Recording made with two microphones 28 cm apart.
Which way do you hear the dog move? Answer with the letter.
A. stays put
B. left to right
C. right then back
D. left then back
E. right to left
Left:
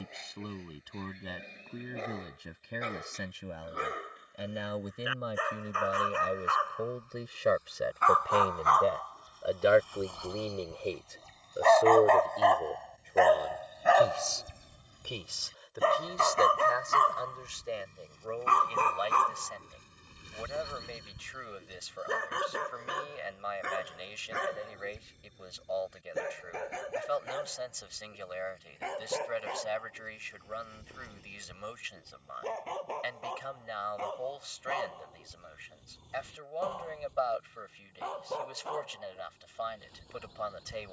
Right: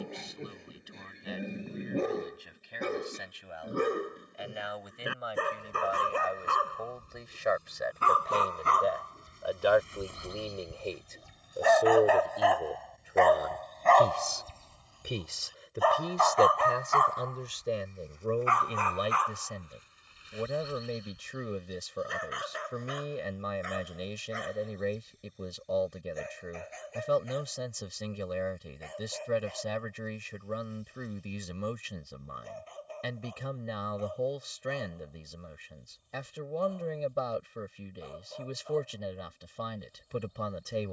E.